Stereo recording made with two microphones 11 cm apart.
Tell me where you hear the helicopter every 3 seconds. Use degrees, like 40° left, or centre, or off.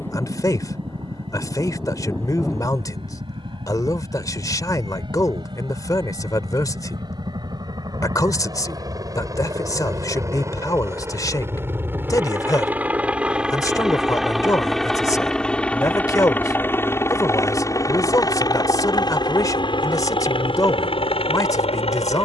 50° right, 50° right, 40° right, 30° right, 10° right, 20° left, 40° left, 50° left.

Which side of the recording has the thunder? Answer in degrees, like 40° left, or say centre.
20° left.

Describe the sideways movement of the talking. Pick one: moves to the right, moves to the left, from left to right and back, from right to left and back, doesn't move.
doesn't move.